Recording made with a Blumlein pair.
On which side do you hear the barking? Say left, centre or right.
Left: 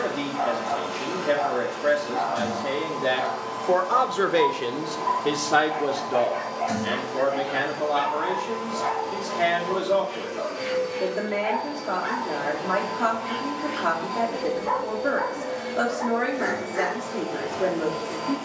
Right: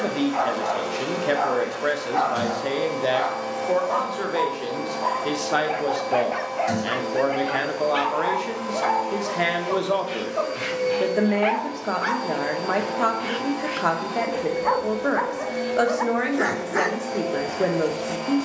right.